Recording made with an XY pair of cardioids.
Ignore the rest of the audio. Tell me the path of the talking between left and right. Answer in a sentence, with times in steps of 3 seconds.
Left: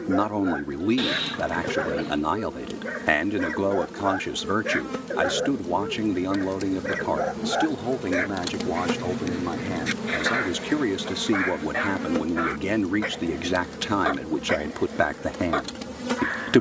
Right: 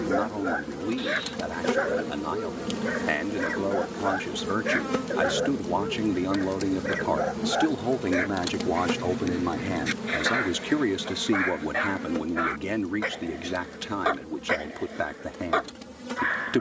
In this clip you hear the talking on the left from 0 s, in the centre from 6 s and on the left from 12 s.